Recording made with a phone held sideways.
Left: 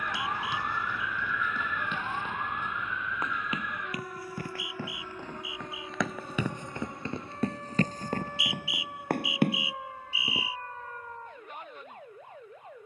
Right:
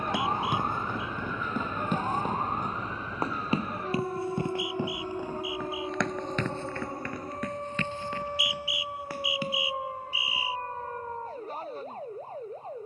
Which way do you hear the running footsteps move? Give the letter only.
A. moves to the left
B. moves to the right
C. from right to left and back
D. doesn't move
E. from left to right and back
A.